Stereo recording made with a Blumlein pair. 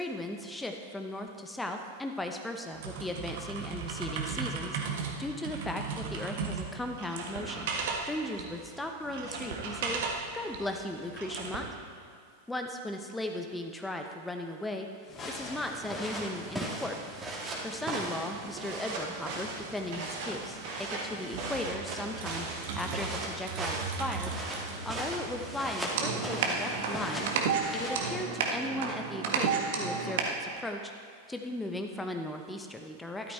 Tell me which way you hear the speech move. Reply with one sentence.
In this clip you hear the speech stay put.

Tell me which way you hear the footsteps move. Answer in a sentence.
In this clip you hear the footsteps move from left to right and back again.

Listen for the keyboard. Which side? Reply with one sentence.
In this clip you hear the keyboard on the right.